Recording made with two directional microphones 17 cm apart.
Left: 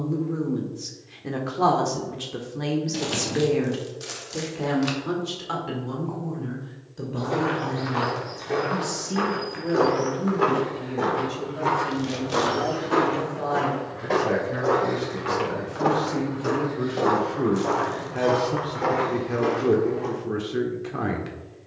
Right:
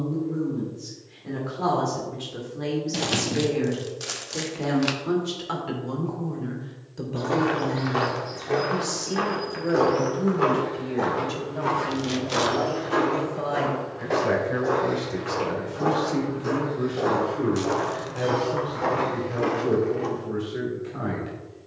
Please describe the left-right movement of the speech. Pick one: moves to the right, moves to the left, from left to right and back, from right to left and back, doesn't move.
from left to right and back.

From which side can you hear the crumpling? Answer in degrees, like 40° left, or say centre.
20° right.